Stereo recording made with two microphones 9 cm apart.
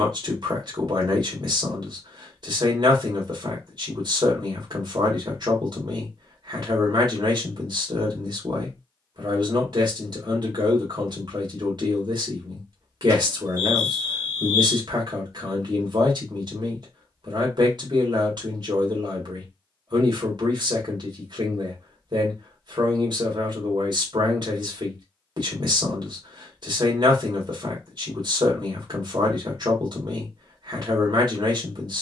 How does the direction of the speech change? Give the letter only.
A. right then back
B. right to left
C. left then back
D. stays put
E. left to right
D.